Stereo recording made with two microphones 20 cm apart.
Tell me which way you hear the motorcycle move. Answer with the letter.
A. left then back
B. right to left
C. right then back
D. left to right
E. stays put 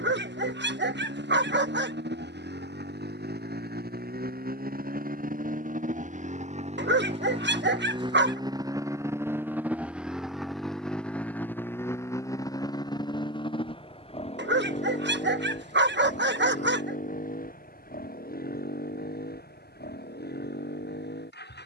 B.